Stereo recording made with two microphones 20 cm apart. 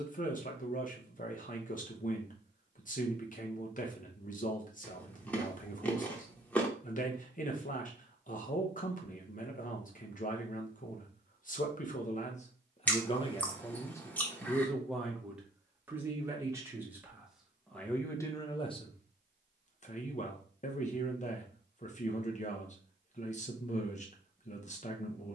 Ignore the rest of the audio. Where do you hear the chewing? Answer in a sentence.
In this clip you hear the chewing in the centre.